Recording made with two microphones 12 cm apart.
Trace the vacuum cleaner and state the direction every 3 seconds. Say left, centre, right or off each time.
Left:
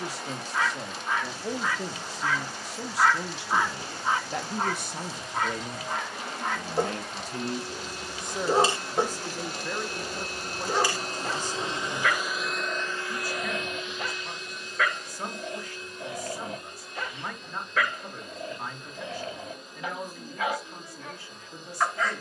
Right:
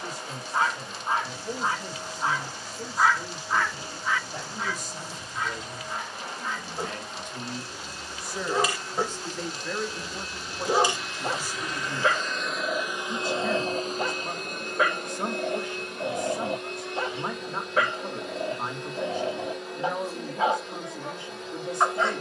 left, left, left, left, right, right, right, right.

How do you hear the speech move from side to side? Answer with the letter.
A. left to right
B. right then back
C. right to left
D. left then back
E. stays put
A.